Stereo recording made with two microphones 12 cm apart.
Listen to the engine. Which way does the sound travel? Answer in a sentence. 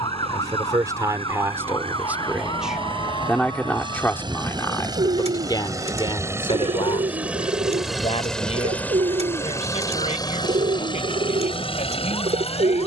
In this clip you hear the engine go from the right side to the left.